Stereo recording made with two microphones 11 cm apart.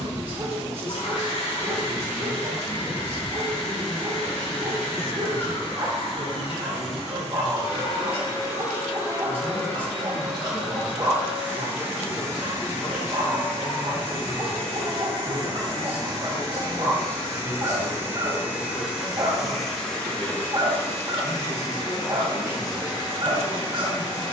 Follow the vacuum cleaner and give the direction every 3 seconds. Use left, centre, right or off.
left, left, left, centre, right, right, centre, left.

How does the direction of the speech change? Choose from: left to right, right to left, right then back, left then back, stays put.
left then back.